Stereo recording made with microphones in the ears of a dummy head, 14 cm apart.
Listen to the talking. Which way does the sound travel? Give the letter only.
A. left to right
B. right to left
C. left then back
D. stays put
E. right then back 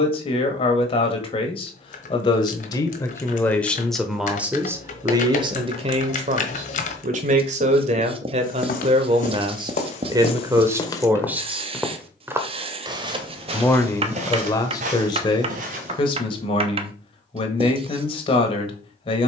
E.